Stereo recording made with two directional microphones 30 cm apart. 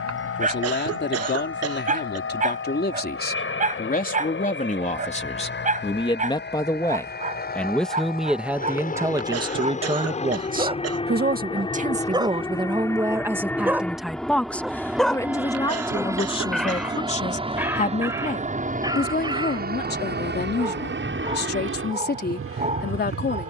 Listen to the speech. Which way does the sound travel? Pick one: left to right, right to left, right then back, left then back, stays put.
right then back.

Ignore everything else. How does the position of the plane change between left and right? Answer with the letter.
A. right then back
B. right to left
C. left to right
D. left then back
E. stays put
C.